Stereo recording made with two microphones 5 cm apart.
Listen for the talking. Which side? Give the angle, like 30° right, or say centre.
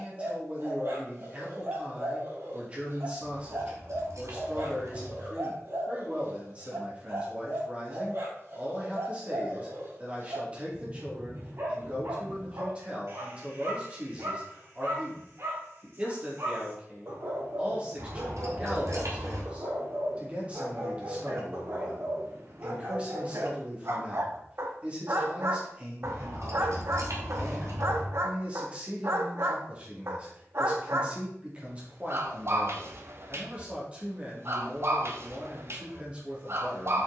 20° right.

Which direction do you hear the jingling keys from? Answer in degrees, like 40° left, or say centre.
70° right.